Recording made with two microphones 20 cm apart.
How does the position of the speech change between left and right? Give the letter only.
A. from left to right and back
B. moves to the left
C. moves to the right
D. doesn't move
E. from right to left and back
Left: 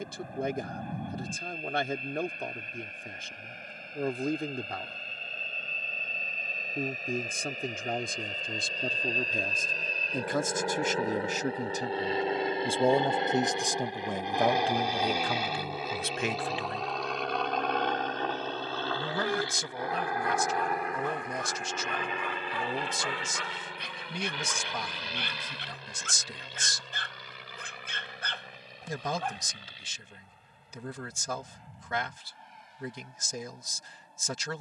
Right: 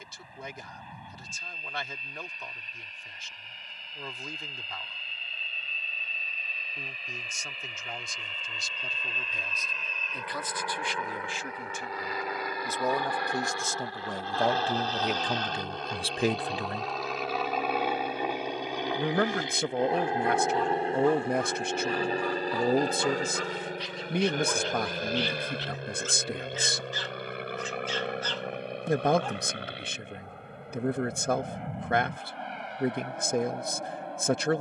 C.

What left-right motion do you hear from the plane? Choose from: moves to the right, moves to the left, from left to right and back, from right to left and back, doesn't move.
moves to the right.